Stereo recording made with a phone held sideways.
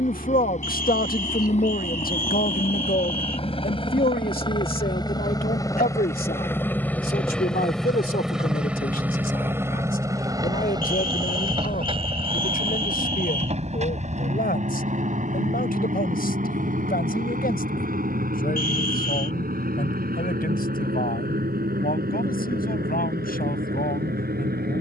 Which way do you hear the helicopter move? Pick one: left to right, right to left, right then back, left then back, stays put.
left to right.